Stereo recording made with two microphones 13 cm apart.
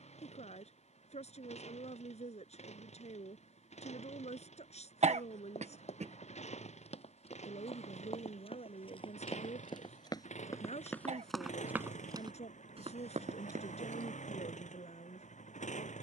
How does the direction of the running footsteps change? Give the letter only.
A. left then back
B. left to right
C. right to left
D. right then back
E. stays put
B.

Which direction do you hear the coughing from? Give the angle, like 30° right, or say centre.
60° right.